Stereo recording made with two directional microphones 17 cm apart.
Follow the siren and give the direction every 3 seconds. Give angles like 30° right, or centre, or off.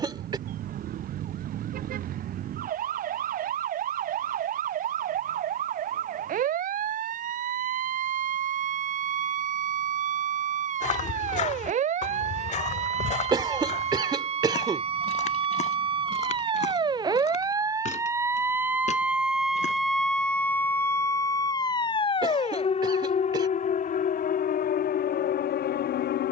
60° right, 60° right, 50° right, 50° right, 40° right, 30° right, centre, 30° left, 60° left.